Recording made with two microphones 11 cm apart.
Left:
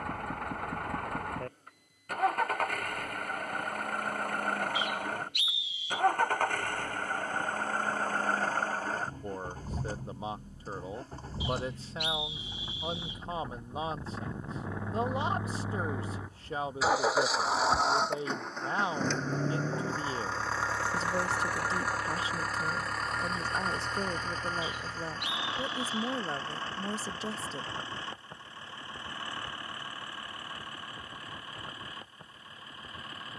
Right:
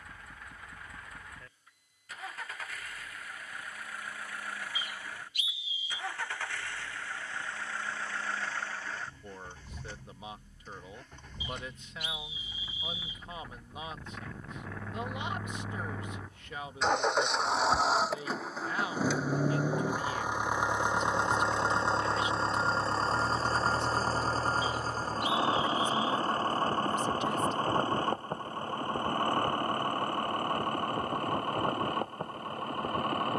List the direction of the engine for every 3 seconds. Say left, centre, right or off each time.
left, left, left, left, left, centre, centre, right, right, right, right.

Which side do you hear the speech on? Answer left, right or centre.
left.